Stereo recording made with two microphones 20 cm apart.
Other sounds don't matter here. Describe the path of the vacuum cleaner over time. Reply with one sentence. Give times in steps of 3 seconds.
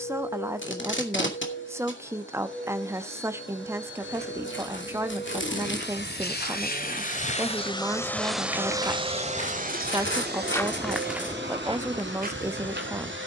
In this clip you hear the vacuum cleaner on the left from 0 s and on the right from 9 s.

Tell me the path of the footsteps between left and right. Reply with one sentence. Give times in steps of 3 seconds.
In this clip you hear the footsteps not at all from 0 s, on the left from 3 s, in the centre from 9 s and on the right from 12 s.